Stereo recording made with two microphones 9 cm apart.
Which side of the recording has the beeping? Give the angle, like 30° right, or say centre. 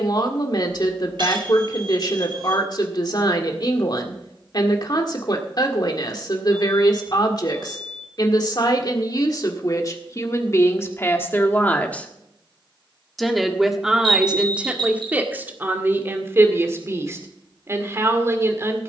60° right.